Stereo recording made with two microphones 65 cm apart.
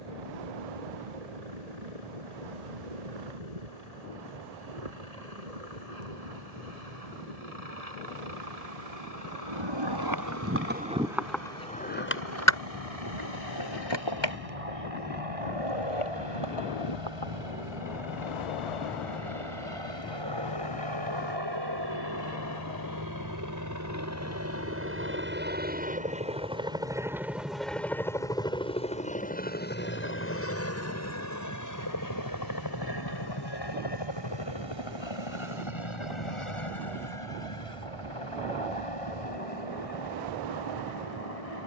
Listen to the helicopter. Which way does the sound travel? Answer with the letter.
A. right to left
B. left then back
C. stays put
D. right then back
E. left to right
A.